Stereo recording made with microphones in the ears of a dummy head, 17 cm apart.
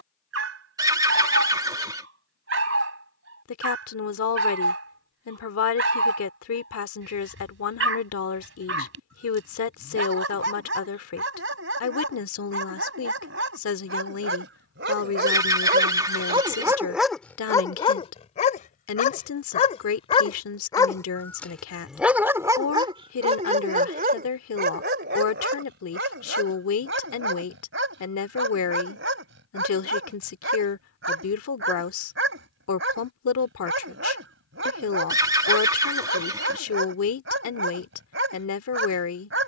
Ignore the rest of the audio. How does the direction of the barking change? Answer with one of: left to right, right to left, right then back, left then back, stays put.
left then back.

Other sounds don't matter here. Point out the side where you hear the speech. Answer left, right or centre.
left.